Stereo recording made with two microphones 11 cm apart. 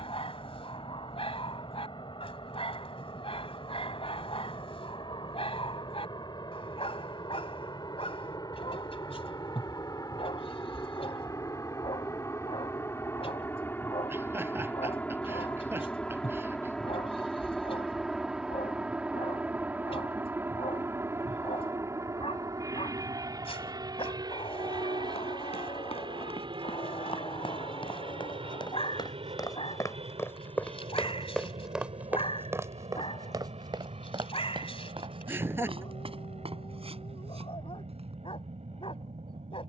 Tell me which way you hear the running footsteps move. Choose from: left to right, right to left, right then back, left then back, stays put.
left to right.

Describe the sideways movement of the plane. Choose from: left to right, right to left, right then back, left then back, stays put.
left to right.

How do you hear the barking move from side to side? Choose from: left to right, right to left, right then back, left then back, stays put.
stays put.